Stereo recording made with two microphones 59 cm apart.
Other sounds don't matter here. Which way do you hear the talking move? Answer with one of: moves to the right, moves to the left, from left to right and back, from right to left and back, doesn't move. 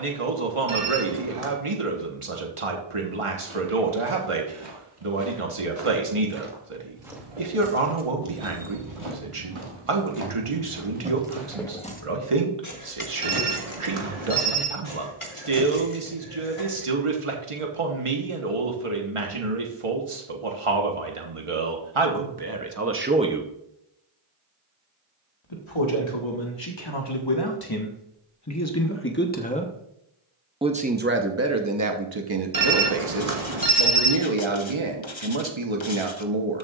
from right to left and back.